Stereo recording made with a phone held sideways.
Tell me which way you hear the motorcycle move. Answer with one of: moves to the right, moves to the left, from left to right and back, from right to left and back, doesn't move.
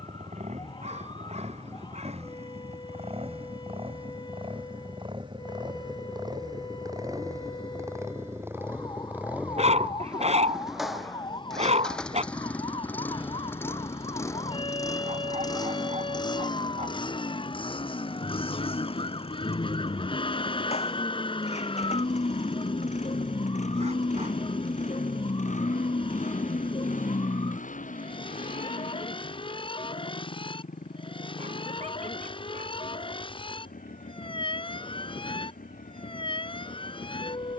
moves to the left.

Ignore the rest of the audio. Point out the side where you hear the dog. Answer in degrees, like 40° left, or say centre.
50° right.